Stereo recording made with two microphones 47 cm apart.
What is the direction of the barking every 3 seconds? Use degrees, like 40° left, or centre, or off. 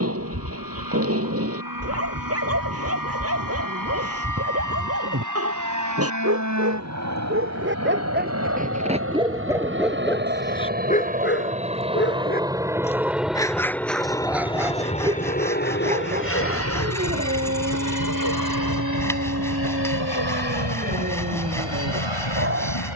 30° right, 30° right, 20° right, 10° left, 10° left, 20° right, 30° right, 30° right.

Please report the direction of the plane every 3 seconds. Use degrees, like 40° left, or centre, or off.
50° right, 40° right, 40° right, 20° right, centre, 30° left, 50° left, 60° left.